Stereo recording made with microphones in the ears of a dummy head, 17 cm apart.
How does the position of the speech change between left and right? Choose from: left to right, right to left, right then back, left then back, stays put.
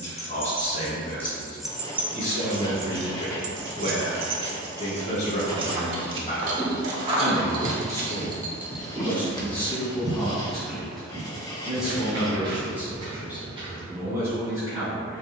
left to right.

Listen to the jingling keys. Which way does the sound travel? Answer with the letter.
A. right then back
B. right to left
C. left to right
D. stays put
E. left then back
A.